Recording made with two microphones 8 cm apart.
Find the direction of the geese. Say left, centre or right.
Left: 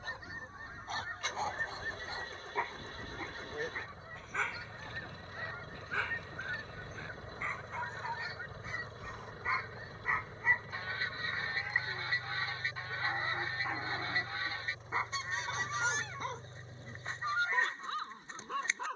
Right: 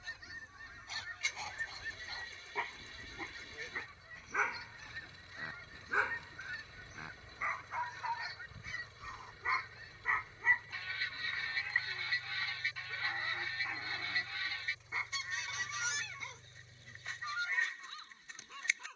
left.